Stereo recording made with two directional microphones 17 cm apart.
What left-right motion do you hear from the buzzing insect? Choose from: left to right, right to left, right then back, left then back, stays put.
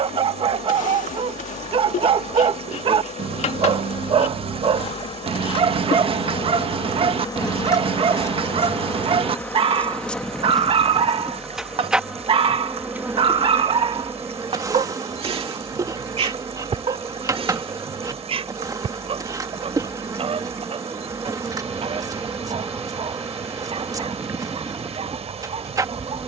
left to right.